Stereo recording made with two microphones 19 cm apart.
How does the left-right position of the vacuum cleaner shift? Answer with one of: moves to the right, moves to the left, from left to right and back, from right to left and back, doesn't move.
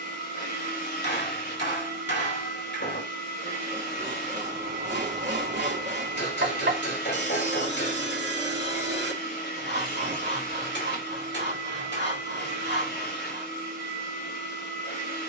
doesn't move.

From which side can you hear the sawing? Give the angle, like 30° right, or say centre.
70° right.